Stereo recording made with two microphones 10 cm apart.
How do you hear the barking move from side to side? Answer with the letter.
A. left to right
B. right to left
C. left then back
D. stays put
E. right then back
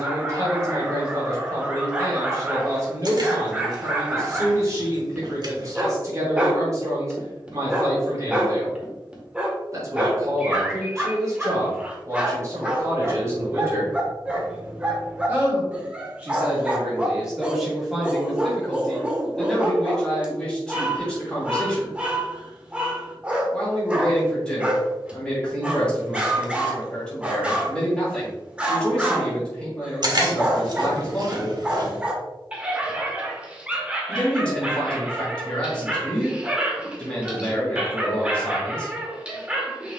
D.